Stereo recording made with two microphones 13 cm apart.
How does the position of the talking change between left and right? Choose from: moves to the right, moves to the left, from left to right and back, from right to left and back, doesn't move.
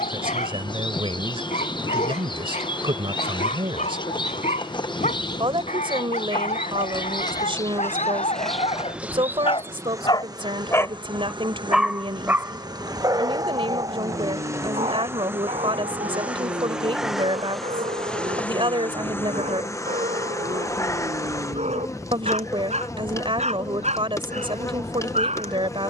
doesn't move.